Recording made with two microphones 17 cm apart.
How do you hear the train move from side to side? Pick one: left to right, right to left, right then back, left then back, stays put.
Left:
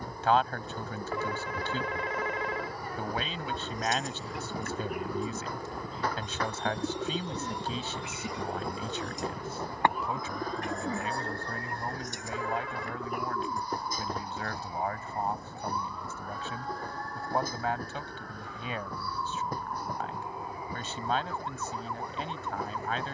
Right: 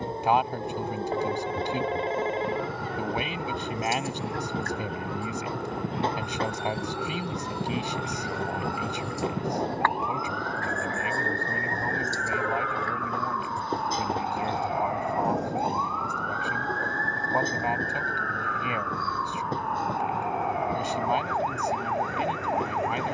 stays put.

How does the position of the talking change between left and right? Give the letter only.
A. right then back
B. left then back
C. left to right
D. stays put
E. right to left
D.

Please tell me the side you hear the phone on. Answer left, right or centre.
right.